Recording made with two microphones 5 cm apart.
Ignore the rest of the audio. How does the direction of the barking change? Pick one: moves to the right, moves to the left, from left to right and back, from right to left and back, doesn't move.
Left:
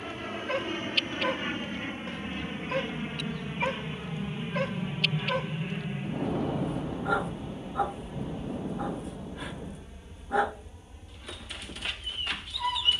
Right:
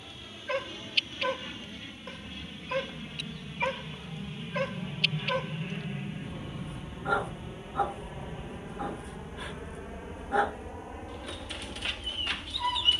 doesn't move.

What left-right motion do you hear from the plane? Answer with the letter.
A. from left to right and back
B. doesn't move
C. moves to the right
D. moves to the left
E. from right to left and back
C.